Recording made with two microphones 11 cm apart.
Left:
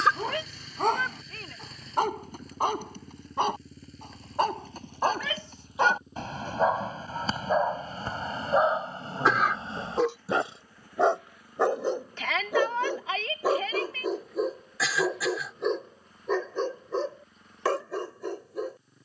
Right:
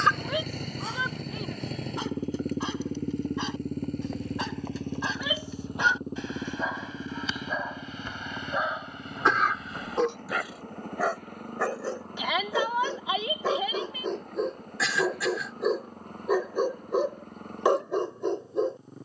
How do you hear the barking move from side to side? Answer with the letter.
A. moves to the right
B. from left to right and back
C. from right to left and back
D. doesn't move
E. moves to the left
A.